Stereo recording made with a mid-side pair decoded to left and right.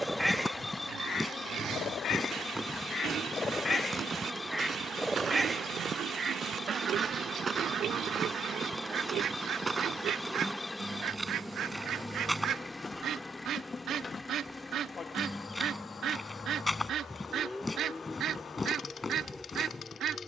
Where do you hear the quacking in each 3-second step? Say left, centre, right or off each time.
left, centre, right, right, right, right, right.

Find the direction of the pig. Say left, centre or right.
right.